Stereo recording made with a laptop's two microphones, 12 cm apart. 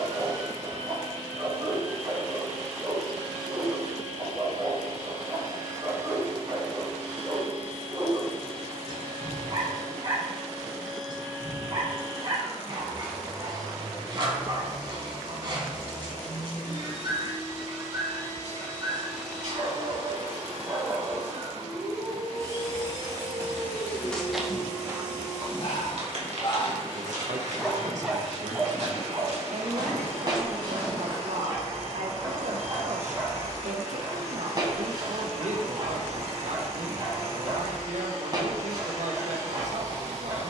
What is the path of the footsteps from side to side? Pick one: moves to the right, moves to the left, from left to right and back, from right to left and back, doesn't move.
from left to right and back.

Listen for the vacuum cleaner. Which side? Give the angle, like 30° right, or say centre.
60° right.